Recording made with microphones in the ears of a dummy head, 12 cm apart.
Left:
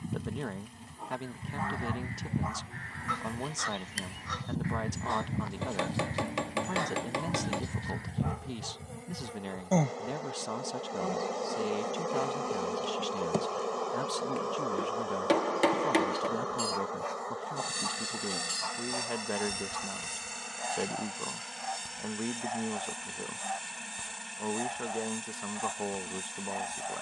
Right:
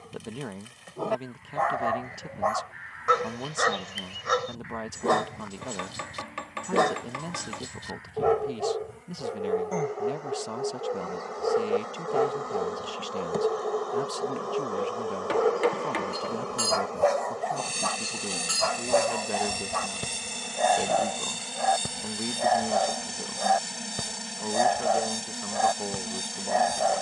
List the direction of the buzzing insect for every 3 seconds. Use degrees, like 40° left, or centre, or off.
60° left, 50° left, 40° left, 30° left, 10° left, 10° right, 30° right, 40° right, 40° right.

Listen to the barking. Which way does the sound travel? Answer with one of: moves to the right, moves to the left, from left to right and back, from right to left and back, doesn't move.
doesn't move.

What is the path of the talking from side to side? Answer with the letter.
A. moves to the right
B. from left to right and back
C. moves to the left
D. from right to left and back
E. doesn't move
E.